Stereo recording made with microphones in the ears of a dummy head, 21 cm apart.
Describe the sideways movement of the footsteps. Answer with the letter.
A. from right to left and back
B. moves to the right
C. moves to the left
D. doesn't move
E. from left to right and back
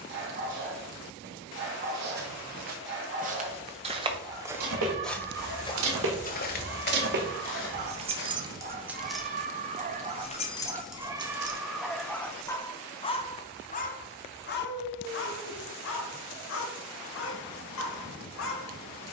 C.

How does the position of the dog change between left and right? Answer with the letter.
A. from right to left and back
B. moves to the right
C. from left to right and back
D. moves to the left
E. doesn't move
D.